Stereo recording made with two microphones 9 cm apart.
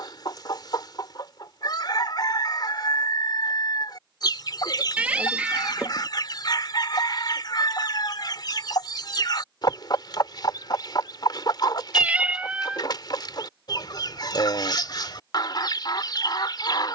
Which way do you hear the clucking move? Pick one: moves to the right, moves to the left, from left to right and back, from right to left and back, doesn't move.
doesn't move.